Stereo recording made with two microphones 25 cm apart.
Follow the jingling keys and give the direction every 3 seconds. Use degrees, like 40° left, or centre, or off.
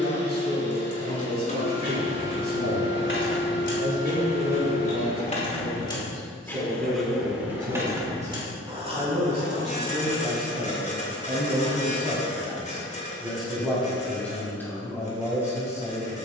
60° left, 30° left, 10° right, 30° right, off, off.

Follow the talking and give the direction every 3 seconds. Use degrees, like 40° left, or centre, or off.
40° right, 40° right, 30° right, 20° right, centre, 10° left.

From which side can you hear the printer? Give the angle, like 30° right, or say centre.
30° left.